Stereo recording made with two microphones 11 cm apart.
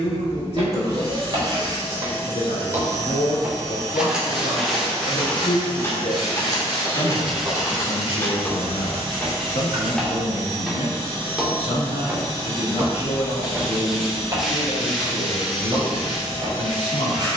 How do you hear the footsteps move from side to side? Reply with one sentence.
You can hear the footsteps move from right to left and back again.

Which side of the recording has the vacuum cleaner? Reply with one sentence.
You can hear the vacuum cleaner on the right.